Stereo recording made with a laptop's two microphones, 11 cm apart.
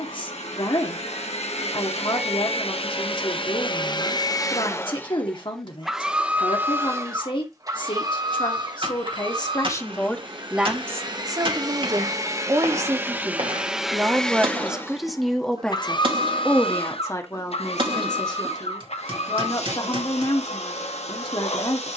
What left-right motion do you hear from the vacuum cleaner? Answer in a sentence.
In this clip you hear the vacuum cleaner move from left to right and back again.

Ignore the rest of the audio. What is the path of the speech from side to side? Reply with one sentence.
You can hear the speech move from left to right and back again.